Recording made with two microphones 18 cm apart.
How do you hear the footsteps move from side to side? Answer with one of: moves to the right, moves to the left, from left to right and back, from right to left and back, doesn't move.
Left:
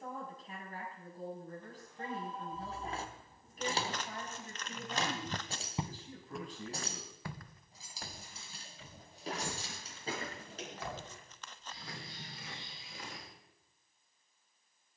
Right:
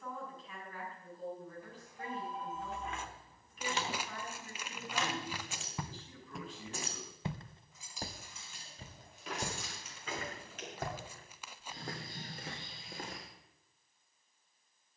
moves to the right.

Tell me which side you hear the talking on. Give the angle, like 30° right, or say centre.
40° left.